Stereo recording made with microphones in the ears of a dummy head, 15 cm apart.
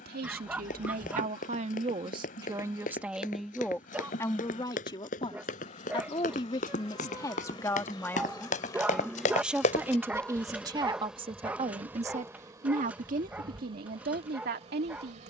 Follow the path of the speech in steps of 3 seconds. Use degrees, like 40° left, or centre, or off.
40° right, 20° left, 20° left, 20° right, 60° right.